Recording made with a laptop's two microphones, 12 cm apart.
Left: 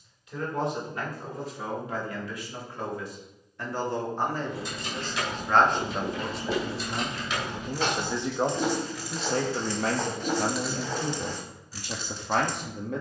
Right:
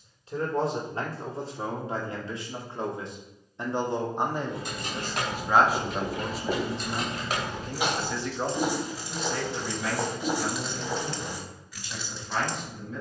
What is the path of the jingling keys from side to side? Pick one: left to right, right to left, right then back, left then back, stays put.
right to left.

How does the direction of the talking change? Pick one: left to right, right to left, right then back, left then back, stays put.
right to left.